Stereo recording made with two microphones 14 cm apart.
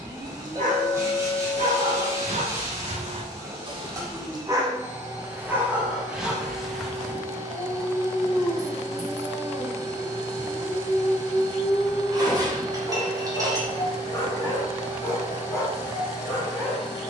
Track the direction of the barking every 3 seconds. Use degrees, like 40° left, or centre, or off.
70° right, 20° right, centre, 20° left, 30° left, 30° left.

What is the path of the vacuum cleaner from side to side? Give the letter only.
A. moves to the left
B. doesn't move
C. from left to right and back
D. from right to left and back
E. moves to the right
B.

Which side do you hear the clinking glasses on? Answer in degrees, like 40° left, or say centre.
30° right.